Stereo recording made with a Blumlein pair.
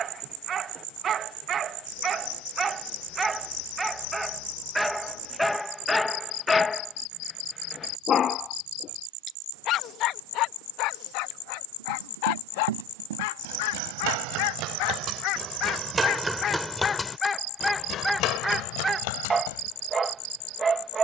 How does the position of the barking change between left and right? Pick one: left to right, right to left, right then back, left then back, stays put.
left then back.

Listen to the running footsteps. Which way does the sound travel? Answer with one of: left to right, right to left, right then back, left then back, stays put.
right to left.